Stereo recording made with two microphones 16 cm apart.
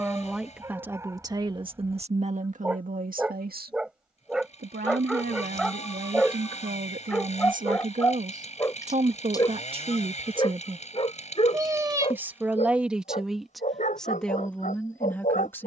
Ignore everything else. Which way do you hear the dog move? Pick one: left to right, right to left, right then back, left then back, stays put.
right to left.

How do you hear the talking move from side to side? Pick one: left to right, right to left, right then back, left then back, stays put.
right then back.